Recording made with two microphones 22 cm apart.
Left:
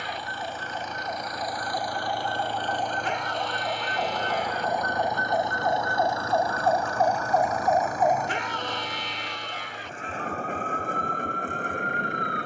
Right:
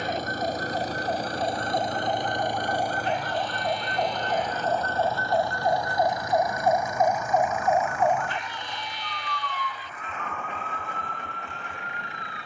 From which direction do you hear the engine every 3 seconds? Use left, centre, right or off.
right, centre, left, left.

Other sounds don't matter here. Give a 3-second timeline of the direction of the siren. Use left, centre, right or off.
right, right, centre, left.